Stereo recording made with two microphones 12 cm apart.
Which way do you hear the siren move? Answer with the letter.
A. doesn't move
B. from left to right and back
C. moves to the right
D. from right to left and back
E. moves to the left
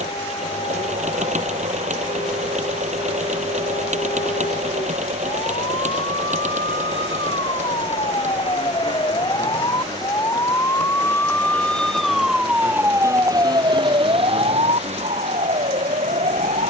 C.